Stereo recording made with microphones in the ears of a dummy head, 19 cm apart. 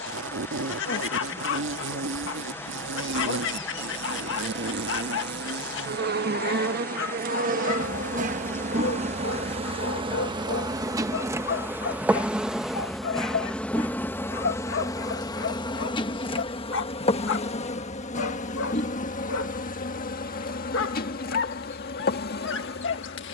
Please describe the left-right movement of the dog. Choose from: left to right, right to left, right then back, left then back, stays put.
stays put.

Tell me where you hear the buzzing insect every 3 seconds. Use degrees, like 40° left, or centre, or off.
70° right, 60° right, 40° right, 20° right, 10° left, 30° left, 40° left, 50° left.